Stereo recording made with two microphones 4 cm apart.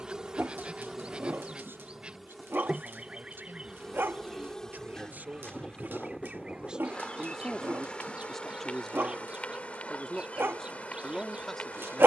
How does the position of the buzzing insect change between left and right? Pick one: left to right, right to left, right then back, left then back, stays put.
right to left.